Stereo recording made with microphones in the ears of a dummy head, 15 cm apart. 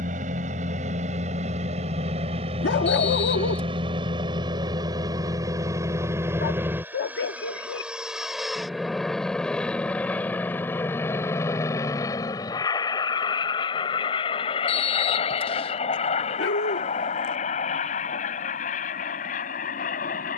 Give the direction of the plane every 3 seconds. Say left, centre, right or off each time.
right, right, centre, centre, left, left, left.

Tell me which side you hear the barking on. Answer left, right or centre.
left.